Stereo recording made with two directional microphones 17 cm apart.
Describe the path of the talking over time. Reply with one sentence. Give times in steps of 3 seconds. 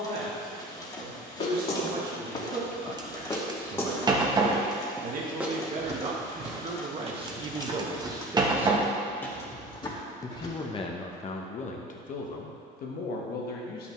In this clip you hear the talking on the right from 0 s and on the left from 9 s.